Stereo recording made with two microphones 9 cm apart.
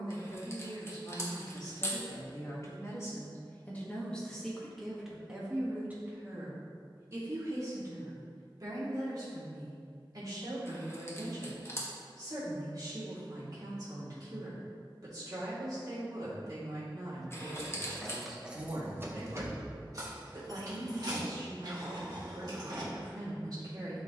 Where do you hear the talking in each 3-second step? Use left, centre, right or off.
left, centre, right, right, right, right, right, right.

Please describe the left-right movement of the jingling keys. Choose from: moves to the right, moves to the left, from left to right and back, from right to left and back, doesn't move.
moves to the right.